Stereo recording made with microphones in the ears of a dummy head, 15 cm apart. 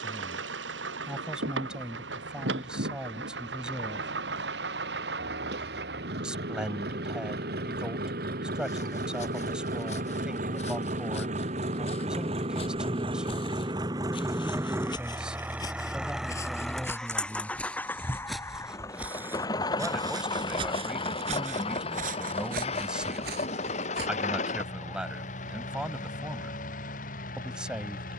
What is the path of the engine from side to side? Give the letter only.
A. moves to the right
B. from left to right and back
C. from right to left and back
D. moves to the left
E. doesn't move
D.